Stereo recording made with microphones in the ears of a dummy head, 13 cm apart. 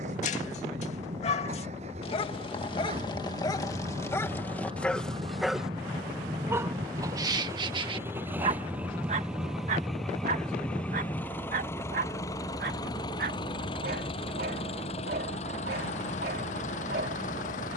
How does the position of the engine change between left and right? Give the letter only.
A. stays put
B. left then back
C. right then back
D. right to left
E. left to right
D.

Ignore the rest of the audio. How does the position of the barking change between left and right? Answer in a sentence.
You can hear the barking travel towards the right.